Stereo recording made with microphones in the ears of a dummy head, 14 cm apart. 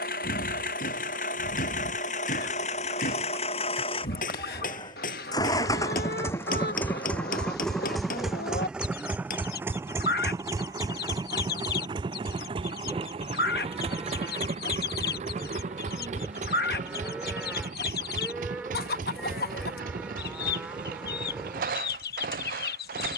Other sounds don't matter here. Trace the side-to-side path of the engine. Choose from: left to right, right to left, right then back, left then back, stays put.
left to right.